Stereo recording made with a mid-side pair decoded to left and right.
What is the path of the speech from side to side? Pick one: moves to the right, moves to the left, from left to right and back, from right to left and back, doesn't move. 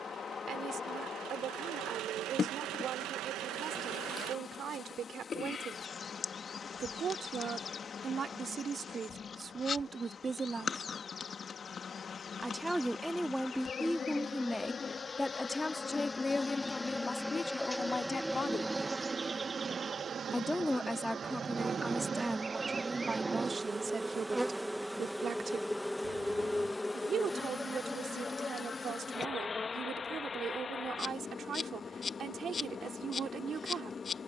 from right to left and back.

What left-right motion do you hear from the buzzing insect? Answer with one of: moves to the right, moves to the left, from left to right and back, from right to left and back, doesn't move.
from left to right and back.